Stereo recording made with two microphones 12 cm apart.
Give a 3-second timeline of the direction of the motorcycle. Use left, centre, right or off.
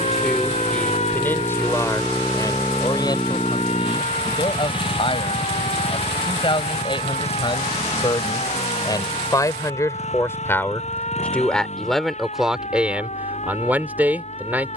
right, left, left, left, left.